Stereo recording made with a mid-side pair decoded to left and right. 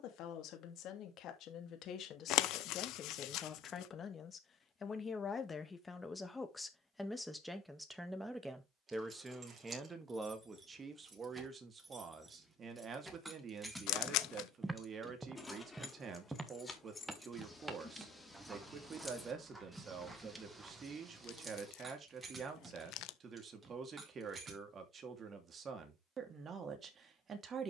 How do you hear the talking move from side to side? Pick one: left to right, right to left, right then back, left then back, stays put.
left to right.